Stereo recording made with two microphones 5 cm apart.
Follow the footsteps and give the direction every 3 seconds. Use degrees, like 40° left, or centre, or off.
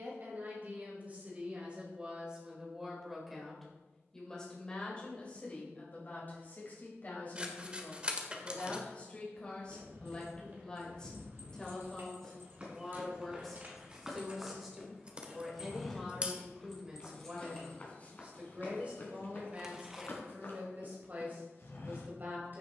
off, off, off, 40° right, 20° right, 20° left, 40° left, 60° left.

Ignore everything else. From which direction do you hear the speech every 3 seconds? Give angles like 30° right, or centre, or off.
30° right, 20° left, 30° left, 20° left, centre, 20° right, 30° right, 40° right.